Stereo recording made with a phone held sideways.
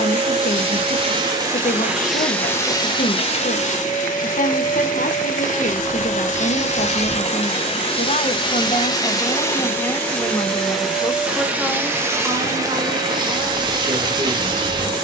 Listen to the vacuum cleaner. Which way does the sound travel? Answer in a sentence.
You can hear the vacuum cleaner go left and come back.